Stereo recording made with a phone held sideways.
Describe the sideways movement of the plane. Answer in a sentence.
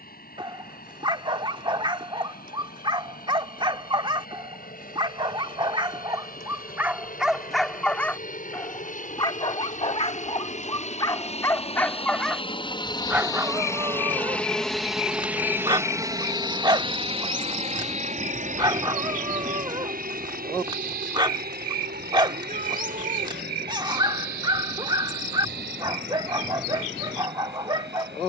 You can hear the plane move to the right.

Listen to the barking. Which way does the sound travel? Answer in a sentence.
You can hear the barking go left and come back.